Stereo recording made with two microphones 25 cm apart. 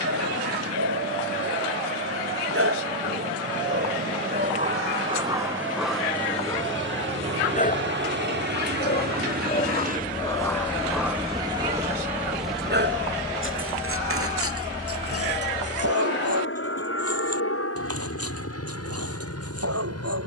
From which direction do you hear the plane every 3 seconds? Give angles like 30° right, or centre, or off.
70° right, 70° right, 50° right, 30° right, 20° left, 50° left, 60° left.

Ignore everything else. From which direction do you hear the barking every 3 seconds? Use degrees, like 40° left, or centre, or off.
70° right, 30° right, 30° left, 10° left, 50° right, 80° right, 80° right.